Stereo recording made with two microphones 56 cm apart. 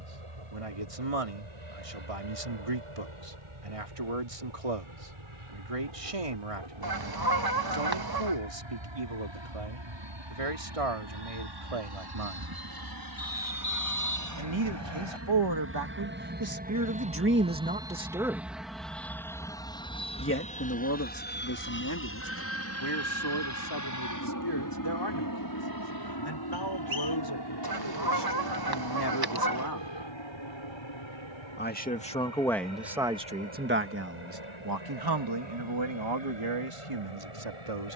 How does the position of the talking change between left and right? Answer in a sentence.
You can hear the talking go left and come back.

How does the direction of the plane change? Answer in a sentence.
In this clip you hear the plane go from the right side to the left.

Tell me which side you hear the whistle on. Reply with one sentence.
In this clip you hear the whistle on the left.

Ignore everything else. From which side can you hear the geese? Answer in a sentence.
You can hear the geese on the right.